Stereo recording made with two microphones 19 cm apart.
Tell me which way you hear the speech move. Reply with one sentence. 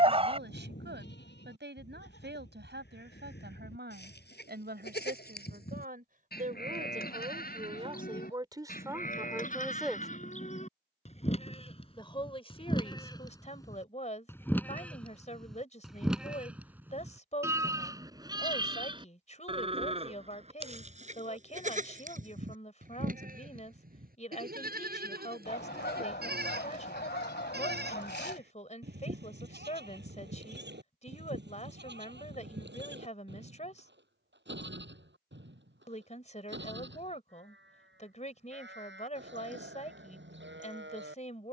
In this clip you hear the speech travel towards the left.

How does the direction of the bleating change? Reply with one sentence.
In this clip you hear the bleating go from the left side to the right.